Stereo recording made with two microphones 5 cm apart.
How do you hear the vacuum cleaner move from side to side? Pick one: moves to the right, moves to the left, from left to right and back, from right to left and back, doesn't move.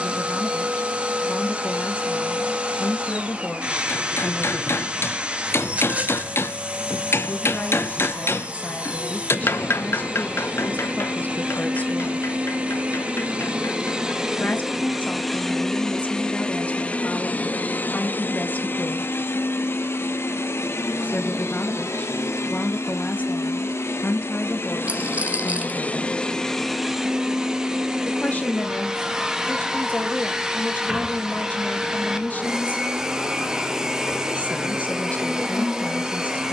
from right to left and back.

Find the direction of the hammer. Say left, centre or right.
left.